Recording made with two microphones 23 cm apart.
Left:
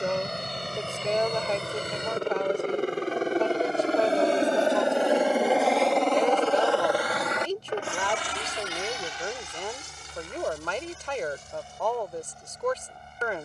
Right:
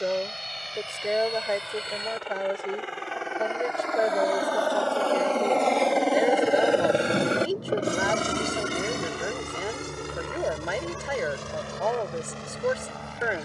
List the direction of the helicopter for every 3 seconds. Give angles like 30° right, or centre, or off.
50° left, 20° left, 30° right, 60° right, 70° right.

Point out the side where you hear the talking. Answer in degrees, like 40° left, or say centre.
10° right.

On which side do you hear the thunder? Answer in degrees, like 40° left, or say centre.
70° right.